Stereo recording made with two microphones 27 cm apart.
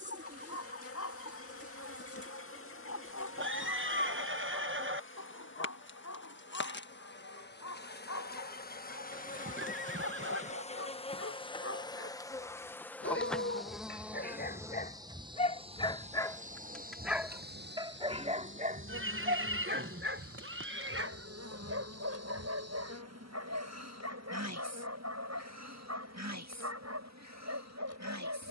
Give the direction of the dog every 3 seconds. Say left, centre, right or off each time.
left, left, left, left, left, centre, right, right, right, right.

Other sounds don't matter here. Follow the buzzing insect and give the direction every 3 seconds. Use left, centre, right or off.
left, left, left, left, centre, right, right, right, right, right.